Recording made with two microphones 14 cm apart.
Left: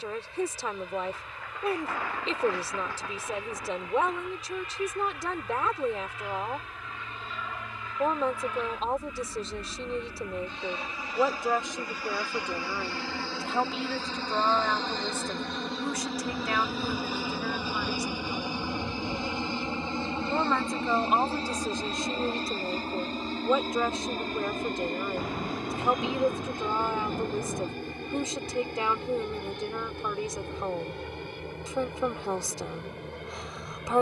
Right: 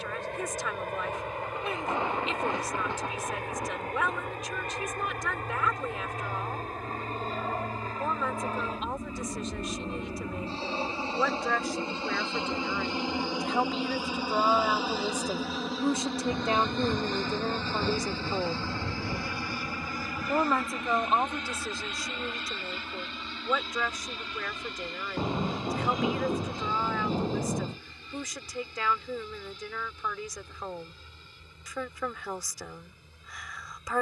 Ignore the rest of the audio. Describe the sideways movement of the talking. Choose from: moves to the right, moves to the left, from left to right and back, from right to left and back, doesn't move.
from left to right and back.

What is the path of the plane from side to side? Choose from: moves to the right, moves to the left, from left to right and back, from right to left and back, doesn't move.
moves to the left.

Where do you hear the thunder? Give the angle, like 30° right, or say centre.
20° right.